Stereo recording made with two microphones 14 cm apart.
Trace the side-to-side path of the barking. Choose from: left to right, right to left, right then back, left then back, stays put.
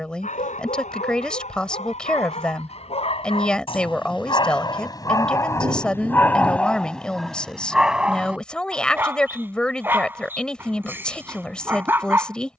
left to right.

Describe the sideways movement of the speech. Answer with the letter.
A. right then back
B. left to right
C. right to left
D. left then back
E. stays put
E.